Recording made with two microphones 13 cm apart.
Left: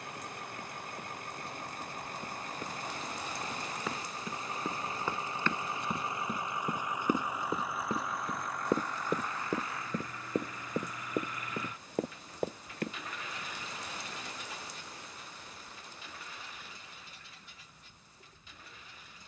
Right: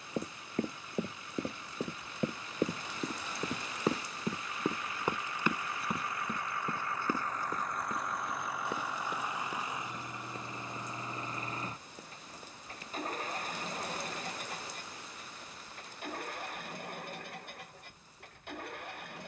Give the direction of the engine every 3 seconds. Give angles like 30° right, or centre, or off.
50° left, 40° left, 10° left, 20° right, 40° right, 60° right, 60° right.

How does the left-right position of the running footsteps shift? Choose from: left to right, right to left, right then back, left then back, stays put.
right to left.